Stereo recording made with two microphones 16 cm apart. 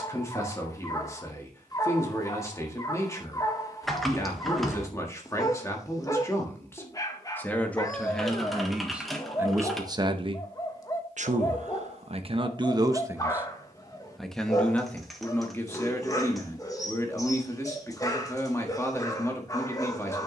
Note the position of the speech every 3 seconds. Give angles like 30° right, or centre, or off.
20° left, 20° left, 10° left, 30° right, 10° right, 20° left, 20° left.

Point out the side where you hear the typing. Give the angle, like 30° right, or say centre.
centre.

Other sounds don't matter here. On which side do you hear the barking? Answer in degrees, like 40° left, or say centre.
20° left.